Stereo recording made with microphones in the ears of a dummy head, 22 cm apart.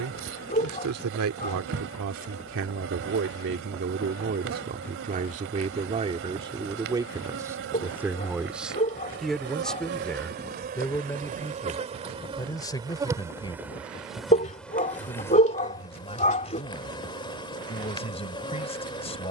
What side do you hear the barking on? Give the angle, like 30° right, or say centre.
30° left.